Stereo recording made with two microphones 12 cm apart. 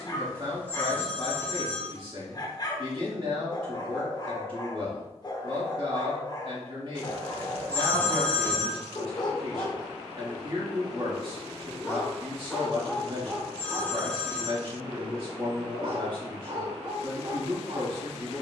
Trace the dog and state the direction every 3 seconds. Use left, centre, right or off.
left, left, left, left, centre, right.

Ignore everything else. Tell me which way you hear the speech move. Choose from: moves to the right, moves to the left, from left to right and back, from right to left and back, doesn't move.
doesn't move.